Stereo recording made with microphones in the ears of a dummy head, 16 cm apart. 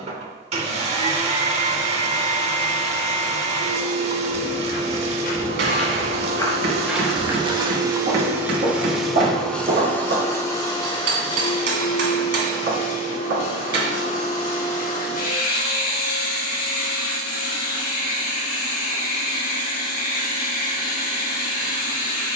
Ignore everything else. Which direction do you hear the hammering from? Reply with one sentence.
In this clip you hear the hammering on the right.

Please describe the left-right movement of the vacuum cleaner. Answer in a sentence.
You can hear the vacuum cleaner go from the right side to the left.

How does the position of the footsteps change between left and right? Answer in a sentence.
In this clip you hear the footsteps move to the right.